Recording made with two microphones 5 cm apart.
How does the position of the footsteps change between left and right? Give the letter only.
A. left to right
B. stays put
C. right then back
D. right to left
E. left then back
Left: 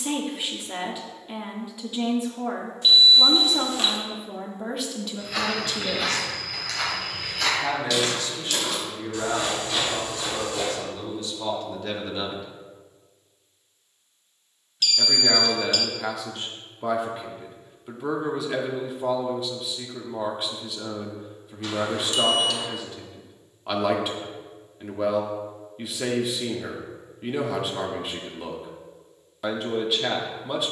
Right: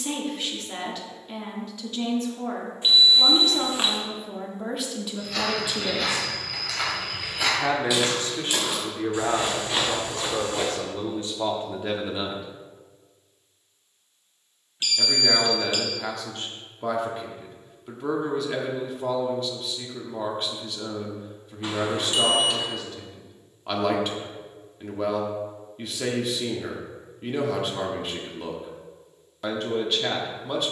A.